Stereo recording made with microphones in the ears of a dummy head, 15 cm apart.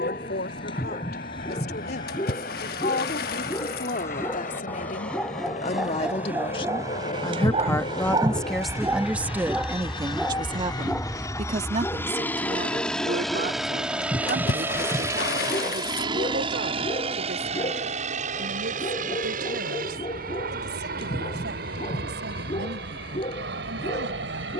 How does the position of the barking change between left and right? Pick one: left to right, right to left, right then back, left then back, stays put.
right then back.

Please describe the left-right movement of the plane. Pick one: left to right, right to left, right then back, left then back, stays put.
left to right.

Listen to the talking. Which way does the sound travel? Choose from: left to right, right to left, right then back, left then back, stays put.
left to right.